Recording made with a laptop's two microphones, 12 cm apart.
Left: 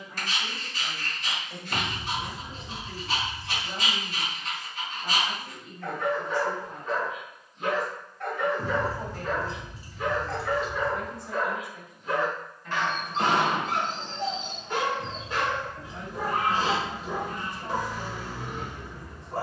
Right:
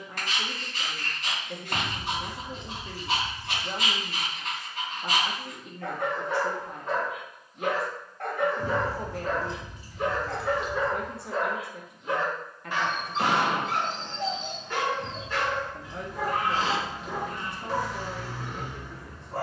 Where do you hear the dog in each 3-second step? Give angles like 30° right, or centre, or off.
60° right, 60° right, 60° right, 40° right, centre, 20° left, 20° left.